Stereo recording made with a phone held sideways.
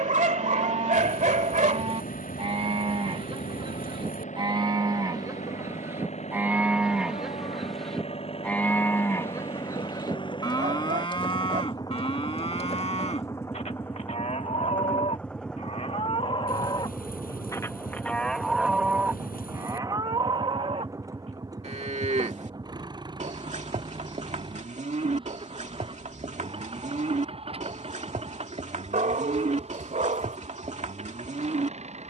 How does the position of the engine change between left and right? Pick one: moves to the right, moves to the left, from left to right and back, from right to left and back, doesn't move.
moves to the right.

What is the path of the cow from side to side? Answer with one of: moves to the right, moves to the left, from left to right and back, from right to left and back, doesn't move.
from right to left and back.